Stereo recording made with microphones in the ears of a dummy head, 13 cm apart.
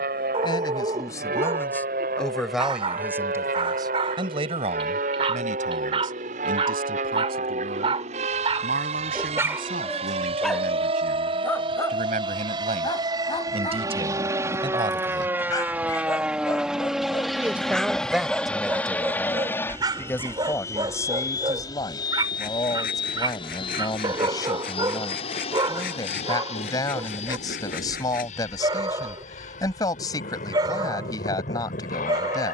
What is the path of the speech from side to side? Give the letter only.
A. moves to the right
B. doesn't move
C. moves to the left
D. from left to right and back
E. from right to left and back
D.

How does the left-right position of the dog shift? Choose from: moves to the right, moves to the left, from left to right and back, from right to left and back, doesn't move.
from right to left and back.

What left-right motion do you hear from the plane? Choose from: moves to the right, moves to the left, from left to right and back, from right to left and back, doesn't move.
moves to the left.